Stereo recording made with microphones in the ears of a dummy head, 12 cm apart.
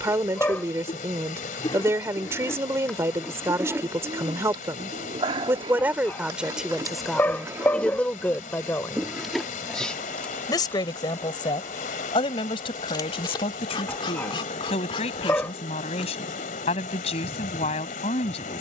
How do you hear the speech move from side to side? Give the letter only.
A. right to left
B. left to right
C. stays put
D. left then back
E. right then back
A.